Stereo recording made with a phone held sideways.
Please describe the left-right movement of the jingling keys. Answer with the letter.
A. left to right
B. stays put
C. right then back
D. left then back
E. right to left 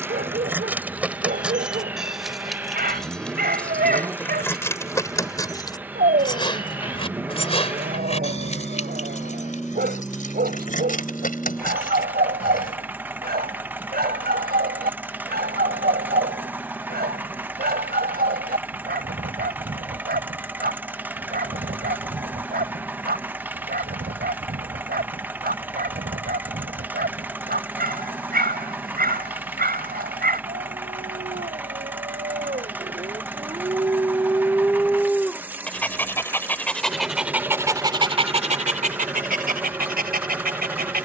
E.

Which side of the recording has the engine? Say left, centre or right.
centre.